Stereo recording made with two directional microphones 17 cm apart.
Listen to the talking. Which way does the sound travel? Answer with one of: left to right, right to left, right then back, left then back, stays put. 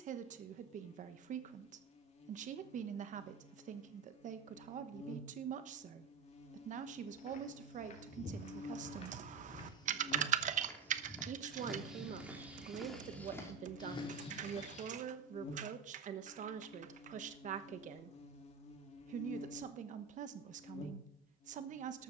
stays put.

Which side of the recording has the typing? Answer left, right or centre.
right.